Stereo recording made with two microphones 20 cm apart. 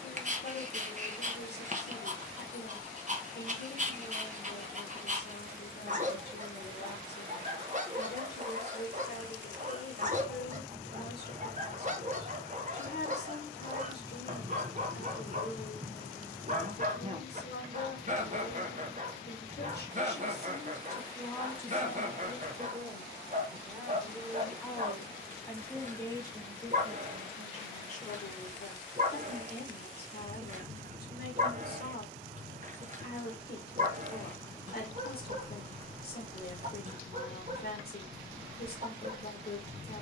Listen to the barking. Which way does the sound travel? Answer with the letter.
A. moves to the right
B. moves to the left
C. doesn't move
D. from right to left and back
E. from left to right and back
C.